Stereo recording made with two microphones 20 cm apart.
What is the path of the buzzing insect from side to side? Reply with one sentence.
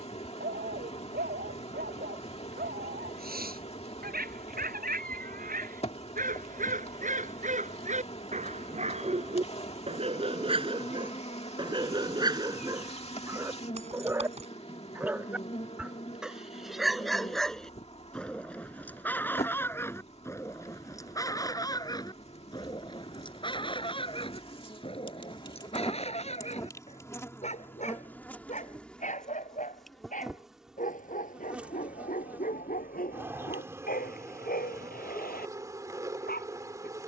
You can hear the buzzing insect move to the right.